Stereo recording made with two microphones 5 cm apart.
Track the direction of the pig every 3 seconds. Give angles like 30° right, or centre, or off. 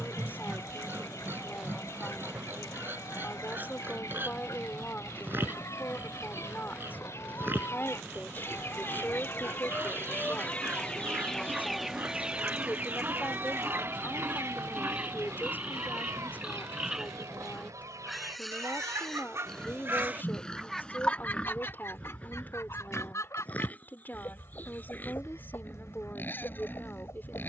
40° right, 40° right, 40° right, 40° right, 30° right, 10° right, 10° left, 30° left, 40° left.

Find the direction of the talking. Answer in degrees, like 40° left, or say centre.
40° left.